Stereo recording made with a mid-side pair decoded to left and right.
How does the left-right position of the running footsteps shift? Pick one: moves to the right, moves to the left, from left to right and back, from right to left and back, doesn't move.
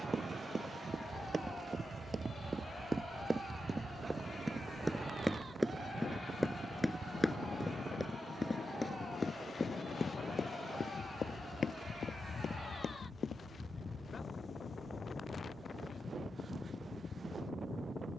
moves to the left.